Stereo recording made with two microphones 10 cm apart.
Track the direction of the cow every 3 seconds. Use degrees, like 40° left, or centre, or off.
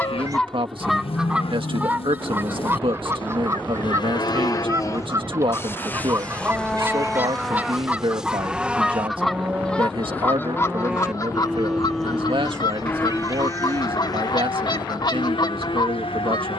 70° left, 40° left, centre, 10° right, 30° left, 70° left.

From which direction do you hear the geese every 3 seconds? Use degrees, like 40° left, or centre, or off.
10° right, 30° right, 20° right, 20° left, 50° left, 50° left.